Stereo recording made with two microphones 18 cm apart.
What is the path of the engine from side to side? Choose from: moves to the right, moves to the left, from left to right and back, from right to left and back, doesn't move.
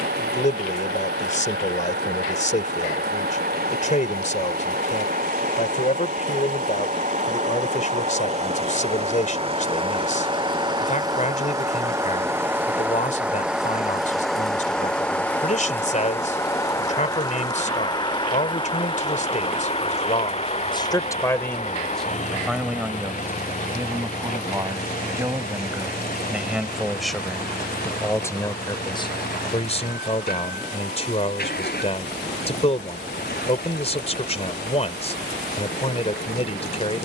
moves to the left.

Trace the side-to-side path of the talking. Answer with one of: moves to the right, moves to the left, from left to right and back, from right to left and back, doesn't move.
from left to right and back.